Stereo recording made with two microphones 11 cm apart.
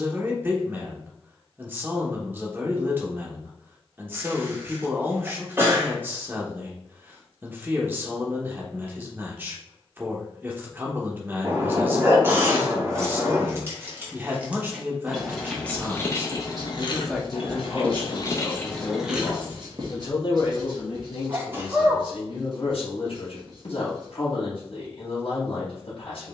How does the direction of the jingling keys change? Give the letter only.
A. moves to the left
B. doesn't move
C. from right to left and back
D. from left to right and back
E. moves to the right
C.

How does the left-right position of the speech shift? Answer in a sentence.
In this clip you hear the speech move from right to left.